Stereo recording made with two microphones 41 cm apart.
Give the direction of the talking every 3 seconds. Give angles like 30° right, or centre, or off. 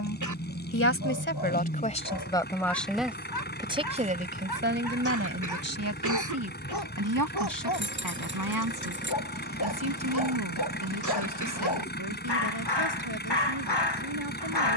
20° left, 20° right, 50° right, 60° right, 70° right.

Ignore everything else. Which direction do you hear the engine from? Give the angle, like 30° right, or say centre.
20° left.